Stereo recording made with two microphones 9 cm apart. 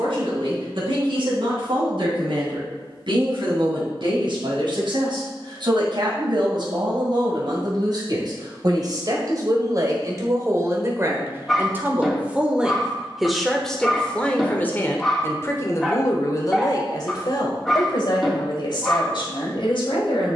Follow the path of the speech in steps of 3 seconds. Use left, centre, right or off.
right, right, right, right, centre, left, left.